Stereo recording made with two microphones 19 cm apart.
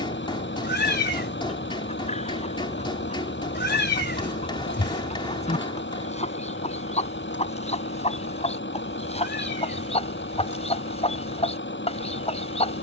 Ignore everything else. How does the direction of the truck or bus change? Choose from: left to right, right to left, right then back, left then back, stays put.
stays put.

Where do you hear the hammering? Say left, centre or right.
left.